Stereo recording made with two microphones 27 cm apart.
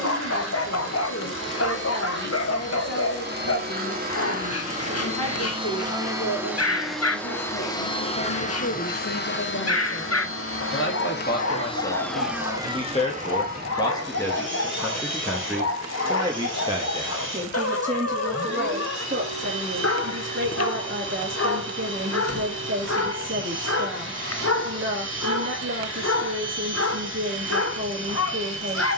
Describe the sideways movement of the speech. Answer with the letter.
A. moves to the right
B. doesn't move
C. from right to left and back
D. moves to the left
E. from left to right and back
A.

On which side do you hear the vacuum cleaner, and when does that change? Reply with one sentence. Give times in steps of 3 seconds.
In this clip you hear the vacuum cleaner on the right from 0 s, in the centre from 6 s, on the left from 9 s and on the right from 12 s.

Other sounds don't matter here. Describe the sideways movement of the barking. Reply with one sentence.
In this clip you hear the barking stay in one place.